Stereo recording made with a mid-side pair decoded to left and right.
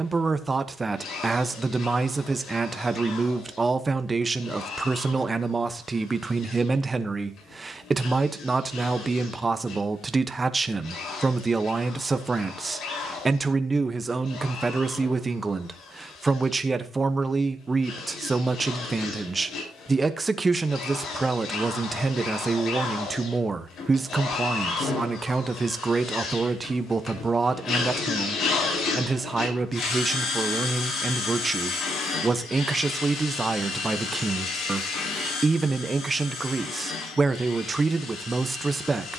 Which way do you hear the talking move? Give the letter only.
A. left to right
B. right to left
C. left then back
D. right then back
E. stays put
E.